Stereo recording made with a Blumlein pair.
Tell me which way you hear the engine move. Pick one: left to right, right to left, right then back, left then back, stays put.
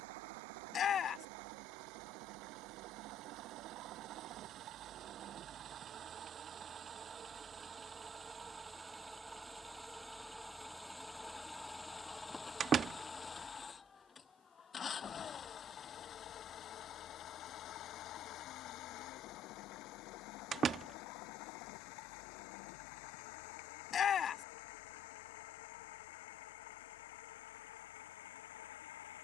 right to left.